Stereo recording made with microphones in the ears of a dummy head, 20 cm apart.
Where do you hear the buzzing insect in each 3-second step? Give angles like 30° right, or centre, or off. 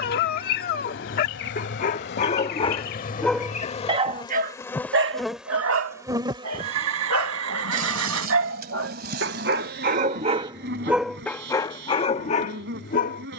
60° left, 20° left, 40° right, 60° right, 60° right.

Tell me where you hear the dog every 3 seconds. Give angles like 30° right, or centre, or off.
40° left, 40° right, 70° right, 20° right, 40° left.